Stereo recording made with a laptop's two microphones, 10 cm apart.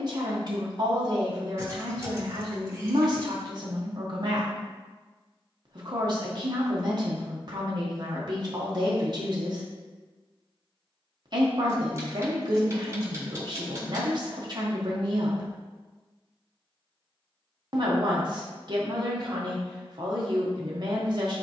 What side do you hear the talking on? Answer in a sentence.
In this clip you hear the talking on the right.